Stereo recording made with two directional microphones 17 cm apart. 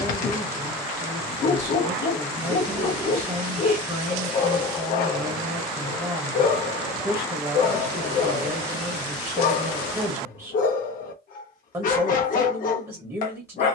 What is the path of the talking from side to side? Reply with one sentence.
In this clip you hear the talking stay in one place.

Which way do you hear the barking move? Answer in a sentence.
In this clip you hear the barking stay put.